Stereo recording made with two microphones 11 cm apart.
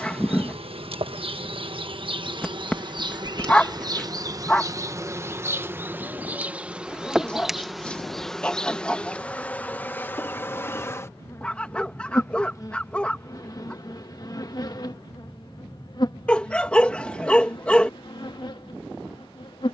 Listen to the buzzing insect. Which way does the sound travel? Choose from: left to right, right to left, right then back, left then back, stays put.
right to left.